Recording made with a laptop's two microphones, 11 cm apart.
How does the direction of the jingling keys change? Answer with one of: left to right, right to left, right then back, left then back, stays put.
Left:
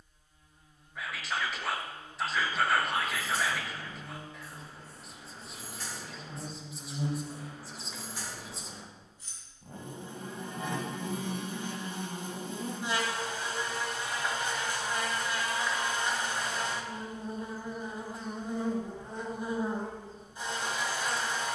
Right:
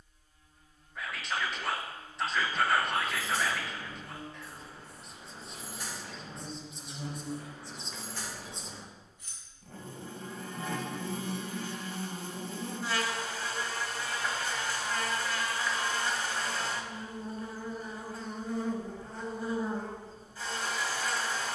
right to left.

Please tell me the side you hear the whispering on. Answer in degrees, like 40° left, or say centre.
centre.